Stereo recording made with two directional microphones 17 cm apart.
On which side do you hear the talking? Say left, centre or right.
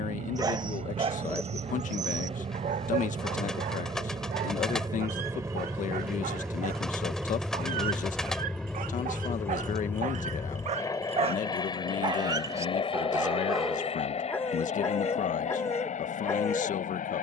left.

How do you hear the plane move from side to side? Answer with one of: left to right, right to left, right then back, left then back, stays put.
right to left.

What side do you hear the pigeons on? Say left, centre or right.
centre.